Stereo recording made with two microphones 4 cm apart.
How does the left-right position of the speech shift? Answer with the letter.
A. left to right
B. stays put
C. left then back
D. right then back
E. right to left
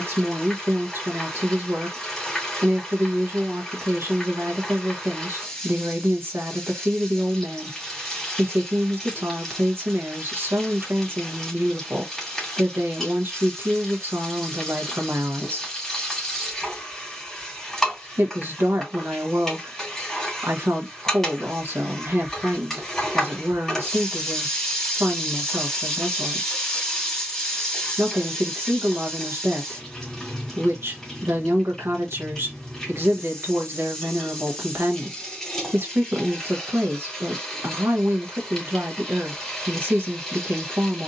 B.